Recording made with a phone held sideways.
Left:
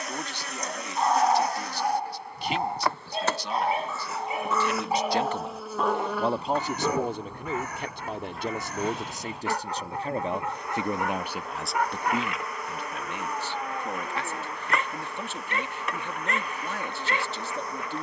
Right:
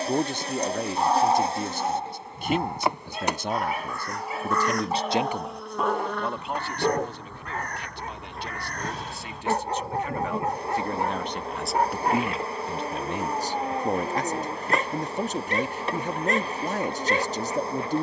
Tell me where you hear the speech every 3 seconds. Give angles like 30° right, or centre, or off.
50° right, 40° right, 50° left, 20° left, 30° right, 40° right.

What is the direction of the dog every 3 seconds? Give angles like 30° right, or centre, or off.
10° left, 20° left, 30° right, 40° right, 40° right, 40° right.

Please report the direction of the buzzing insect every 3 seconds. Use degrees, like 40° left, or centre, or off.
30° right, 10° right, 10° left, 30° right, 30° right, 30° right.